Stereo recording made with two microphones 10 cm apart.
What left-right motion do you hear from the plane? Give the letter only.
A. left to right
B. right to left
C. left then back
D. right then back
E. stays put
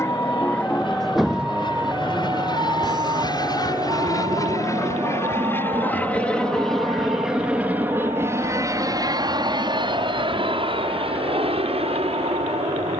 A.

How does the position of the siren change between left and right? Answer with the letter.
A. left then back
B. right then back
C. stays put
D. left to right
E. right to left
D.